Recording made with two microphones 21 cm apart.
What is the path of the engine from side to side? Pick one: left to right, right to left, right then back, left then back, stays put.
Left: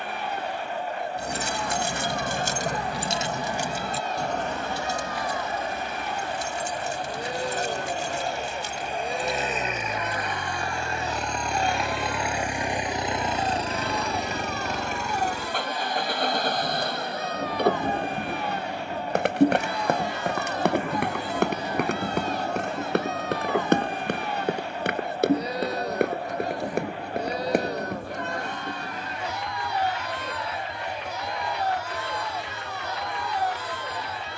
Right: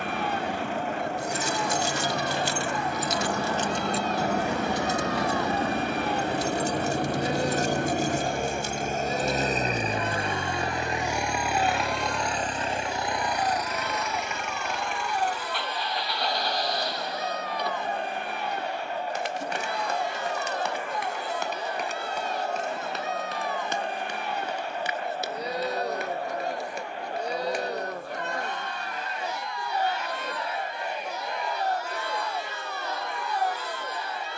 right to left.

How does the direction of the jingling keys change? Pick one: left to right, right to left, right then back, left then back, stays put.
left to right.